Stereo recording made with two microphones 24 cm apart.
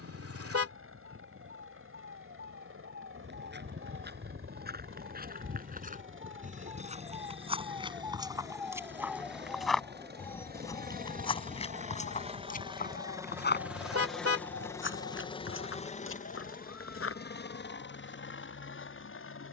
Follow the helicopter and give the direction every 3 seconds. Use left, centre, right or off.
right, right, right, right, centre, left, left.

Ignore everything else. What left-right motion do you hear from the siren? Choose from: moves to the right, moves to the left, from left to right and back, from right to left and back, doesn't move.
moves to the left.